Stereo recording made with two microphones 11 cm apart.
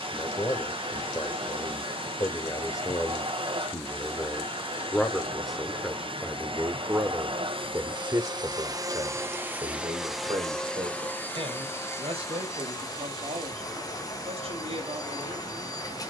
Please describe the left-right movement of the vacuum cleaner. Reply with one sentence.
In this clip you hear the vacuum cleaner move to the left.